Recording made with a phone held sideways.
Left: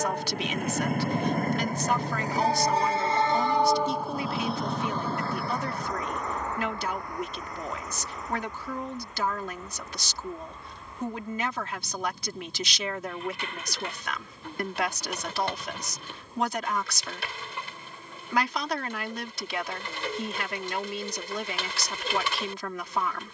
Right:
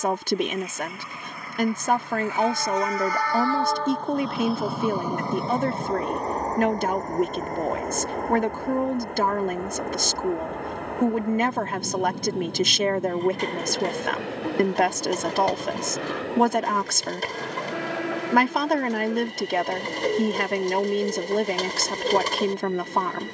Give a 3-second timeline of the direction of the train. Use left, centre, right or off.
left, centre, right, right, right, right, right, right.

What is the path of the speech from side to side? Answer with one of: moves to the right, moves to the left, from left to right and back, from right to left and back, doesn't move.
doesn't move.